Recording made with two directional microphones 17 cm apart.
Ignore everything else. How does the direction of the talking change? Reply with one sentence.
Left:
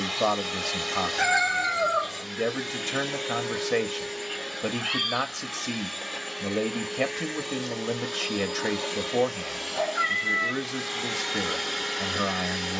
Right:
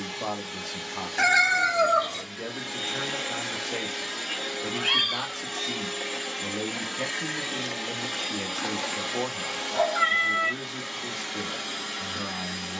You can hear the talking stay in one place.